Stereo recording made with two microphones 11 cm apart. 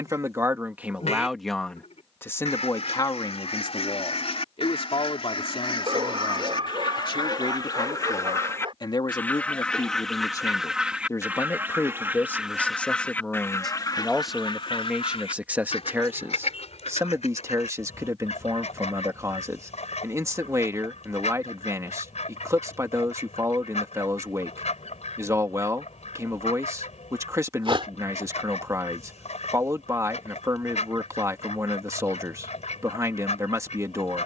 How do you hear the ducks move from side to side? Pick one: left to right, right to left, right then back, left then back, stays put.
right then back.